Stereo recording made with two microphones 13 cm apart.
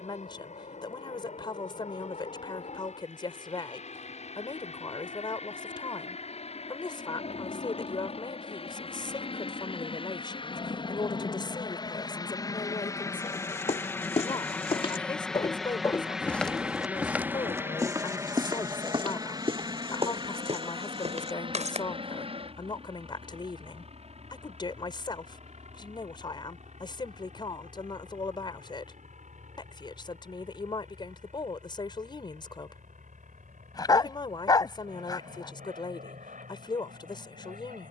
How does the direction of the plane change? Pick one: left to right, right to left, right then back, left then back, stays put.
left to right.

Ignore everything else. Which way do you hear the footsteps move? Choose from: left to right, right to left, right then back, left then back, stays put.
left to right.